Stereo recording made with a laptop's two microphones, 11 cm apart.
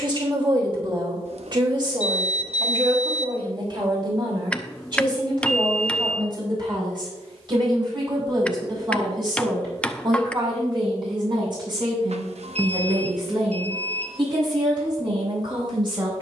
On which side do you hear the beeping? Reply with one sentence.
You can hear the beeping on the right.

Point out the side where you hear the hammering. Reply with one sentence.
You can hear the hammering in the centre.